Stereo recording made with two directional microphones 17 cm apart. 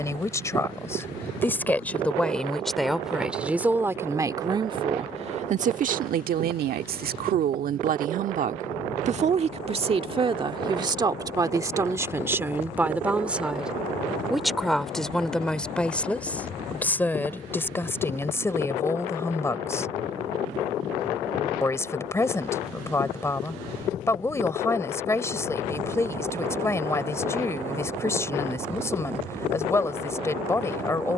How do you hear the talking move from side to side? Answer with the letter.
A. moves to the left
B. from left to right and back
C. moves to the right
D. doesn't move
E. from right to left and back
B.